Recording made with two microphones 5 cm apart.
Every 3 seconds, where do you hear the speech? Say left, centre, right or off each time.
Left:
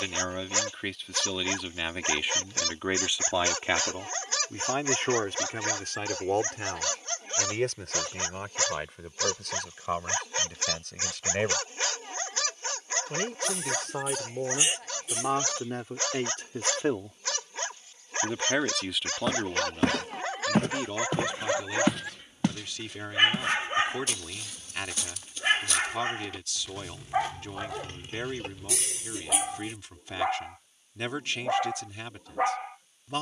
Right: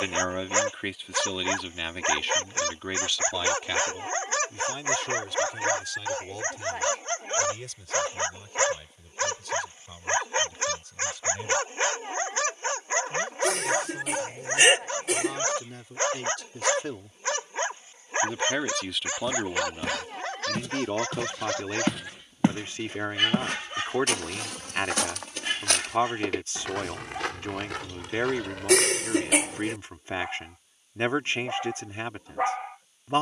centre, left, left, left, left, left, centre, right, right, right, right.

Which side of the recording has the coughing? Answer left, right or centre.
right.